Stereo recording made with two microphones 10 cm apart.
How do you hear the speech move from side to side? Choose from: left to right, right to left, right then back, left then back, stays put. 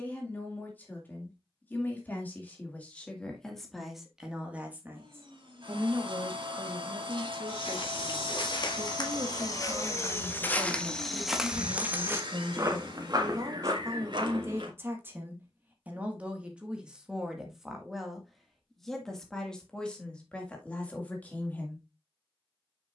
right then back.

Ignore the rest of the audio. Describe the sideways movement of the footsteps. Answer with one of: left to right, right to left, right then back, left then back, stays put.
left to right.